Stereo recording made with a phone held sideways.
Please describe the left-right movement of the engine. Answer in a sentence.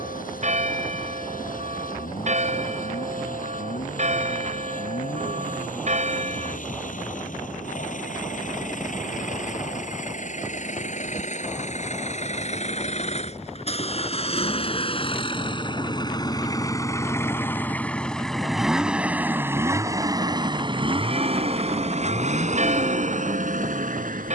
You can hear the engine go from the left side to the right.